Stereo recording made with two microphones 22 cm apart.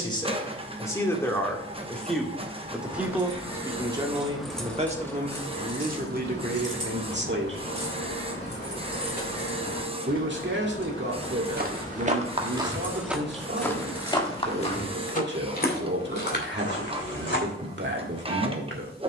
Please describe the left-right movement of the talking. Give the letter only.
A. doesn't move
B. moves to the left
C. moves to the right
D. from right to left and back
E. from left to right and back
C.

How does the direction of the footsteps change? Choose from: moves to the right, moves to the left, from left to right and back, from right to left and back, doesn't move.
moves to the left.